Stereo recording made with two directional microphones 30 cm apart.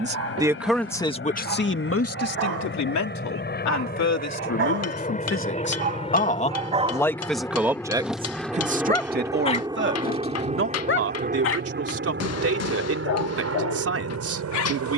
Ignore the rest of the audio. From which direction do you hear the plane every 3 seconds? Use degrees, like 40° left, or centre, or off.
40° left, 30° left, 10° left, 20° right, 50° right.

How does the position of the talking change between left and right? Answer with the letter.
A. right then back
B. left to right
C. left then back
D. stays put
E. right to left
C.